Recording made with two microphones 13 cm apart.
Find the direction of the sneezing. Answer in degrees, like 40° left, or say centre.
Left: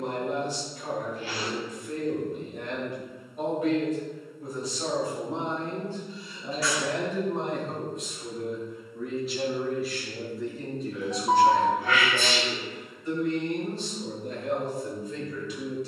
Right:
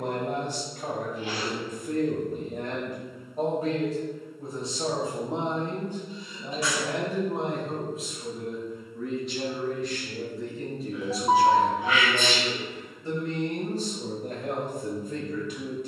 20° right.